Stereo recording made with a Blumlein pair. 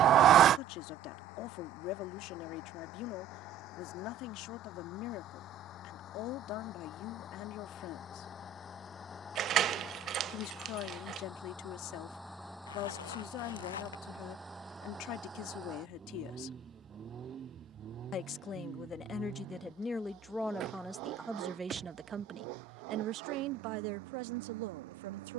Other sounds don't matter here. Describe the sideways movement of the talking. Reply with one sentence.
In this clip you hear the talking go from the left side to the right.